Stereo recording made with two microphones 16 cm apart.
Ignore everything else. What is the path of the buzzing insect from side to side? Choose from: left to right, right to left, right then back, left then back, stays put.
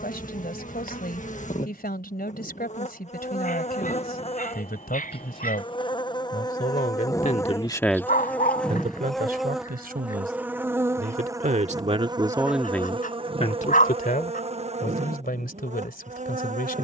left to right.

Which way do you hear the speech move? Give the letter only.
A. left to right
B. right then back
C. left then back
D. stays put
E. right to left
B.